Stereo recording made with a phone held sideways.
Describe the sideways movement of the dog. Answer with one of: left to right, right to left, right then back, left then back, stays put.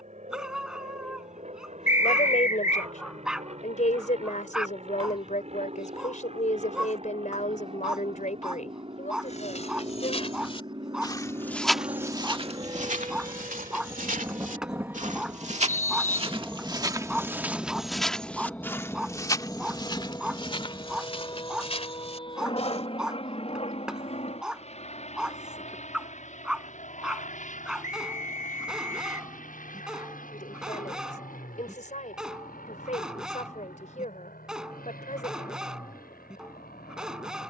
stays put.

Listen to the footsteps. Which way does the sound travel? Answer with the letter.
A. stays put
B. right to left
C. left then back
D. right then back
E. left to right
D.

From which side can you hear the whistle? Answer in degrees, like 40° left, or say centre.
60° left.